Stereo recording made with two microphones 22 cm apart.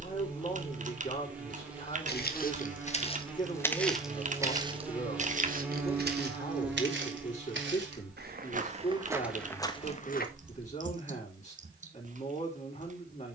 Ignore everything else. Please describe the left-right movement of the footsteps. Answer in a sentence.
You can hear the footsteps go right and come back.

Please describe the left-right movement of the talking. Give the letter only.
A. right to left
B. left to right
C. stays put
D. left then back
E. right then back
C.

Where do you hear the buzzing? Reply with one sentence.
You can hear the buzzing in the centre.